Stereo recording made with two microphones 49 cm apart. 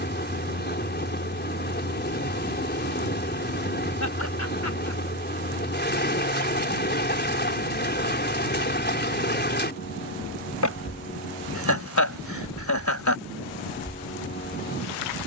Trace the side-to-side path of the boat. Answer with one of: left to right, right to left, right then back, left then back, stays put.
stays put.